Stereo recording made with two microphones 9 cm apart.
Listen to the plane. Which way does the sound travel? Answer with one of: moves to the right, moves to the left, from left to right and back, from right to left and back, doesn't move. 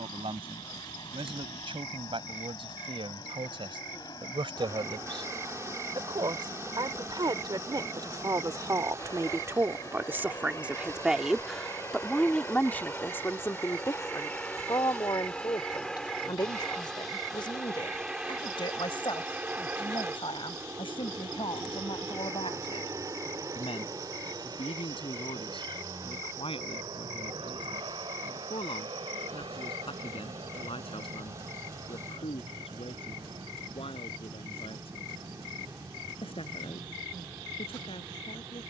moves to the right.